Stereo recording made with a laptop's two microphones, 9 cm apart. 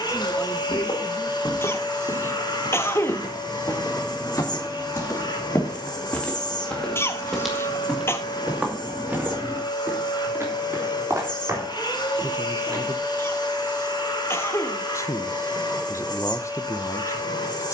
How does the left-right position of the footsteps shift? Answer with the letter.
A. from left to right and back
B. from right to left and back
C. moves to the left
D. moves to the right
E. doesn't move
D.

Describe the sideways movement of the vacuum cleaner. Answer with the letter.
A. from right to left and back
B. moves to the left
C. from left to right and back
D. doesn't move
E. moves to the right
D.